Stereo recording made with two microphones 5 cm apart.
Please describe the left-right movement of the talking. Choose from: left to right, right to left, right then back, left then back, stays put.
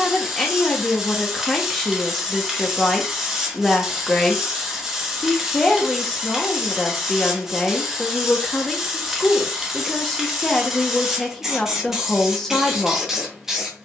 stays put.